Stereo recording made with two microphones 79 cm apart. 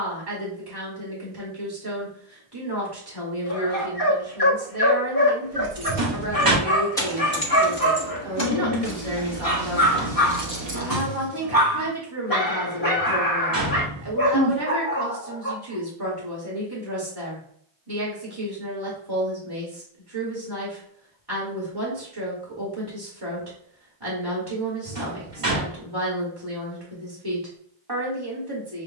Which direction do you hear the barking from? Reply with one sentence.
You can hear the barking on the left.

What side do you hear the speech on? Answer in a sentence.
You can hear the speech on the right.